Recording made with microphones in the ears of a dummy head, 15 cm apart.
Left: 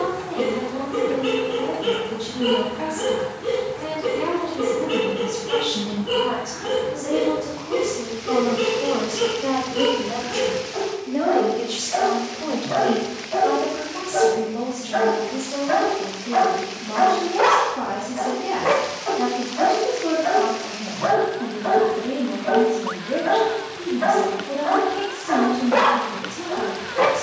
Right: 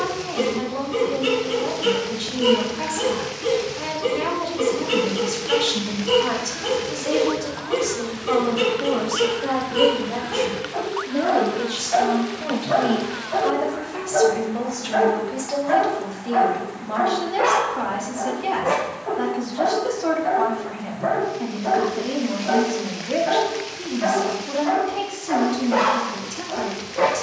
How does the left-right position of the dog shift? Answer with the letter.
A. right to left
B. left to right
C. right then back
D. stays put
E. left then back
A.